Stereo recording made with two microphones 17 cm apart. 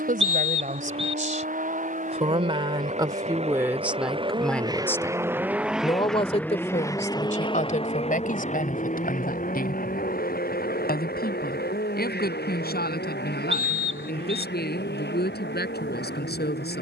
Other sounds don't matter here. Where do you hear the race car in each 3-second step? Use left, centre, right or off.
right, right, left, left, left, left.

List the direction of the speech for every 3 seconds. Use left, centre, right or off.
right, centre, left, left, left, left.